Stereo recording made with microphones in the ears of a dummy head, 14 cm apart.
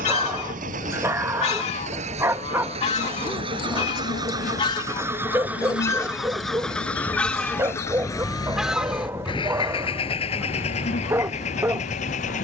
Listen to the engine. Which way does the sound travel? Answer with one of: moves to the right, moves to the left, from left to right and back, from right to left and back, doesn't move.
moves to the left.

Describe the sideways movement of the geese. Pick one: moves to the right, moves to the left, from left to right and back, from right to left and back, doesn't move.
moves to the right.